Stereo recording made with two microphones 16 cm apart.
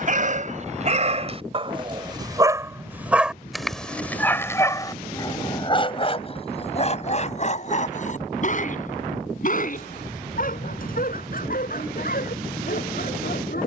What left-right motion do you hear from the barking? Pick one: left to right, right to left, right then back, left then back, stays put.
right to left.